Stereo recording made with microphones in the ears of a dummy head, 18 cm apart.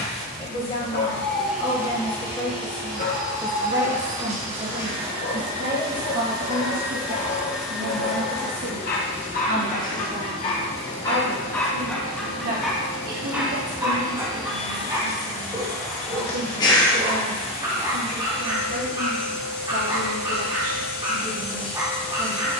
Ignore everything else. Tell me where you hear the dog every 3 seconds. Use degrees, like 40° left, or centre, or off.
50° left, 50° left, 50° left, 30° left, 10° right, 20° right, 20° right, 20° right.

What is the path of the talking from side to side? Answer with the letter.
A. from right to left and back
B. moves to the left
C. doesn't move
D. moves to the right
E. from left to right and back
D.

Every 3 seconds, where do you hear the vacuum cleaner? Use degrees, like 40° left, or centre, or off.
10° right, 30° right, centre, 30° left, 30° left, 30° left, 30° left, 30° left.